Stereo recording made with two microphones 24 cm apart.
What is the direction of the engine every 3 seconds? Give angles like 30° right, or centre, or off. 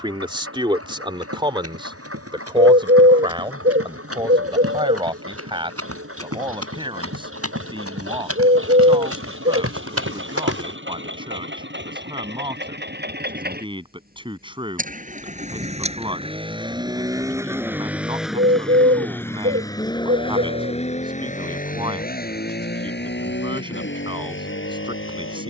70° right, 60° right, 60° right, 50° right, 40° right, 20° right, 10° left, 40° left, 60° left.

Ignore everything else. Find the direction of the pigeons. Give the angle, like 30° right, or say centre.
50° right.